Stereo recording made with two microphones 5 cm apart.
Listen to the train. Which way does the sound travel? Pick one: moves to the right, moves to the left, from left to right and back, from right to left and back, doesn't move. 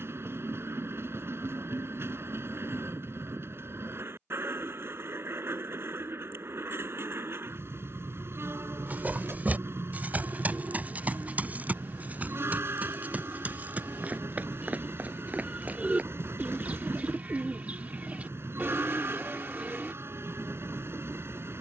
doesn't move.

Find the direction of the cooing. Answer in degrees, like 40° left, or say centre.
30° right.